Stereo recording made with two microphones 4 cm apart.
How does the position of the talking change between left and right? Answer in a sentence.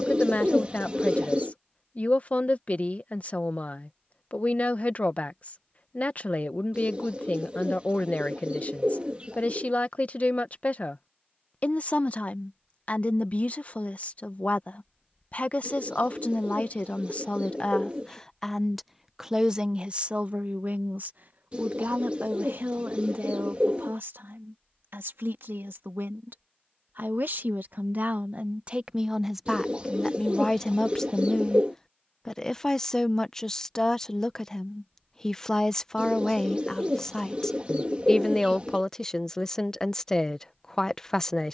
In this clip you hear the talking move from left to right and back again.